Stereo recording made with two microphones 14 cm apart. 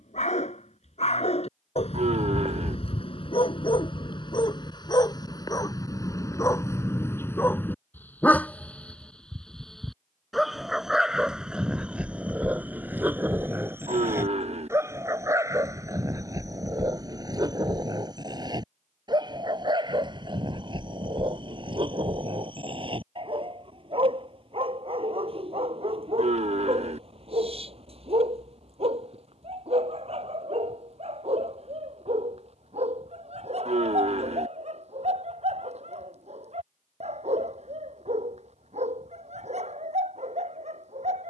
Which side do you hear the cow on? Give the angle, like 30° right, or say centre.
50° right.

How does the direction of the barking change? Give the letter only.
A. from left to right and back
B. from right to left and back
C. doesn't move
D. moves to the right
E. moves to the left
D.